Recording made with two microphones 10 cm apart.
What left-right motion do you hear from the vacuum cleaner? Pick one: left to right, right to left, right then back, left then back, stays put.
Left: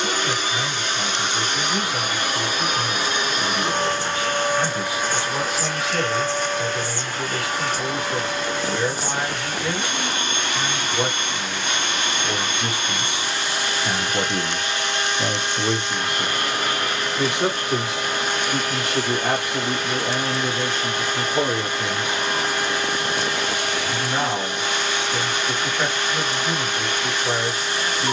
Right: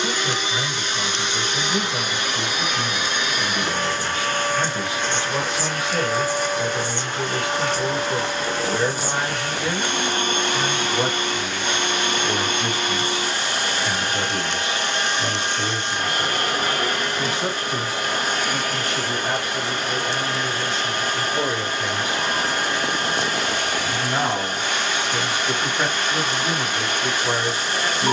left to right.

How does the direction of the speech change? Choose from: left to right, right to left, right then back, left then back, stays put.
left then back.